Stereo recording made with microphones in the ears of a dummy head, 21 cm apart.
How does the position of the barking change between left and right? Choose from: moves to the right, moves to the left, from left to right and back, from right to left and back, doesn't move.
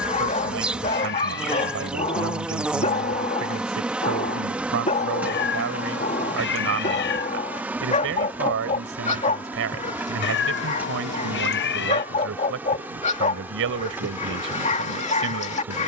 doesn't move.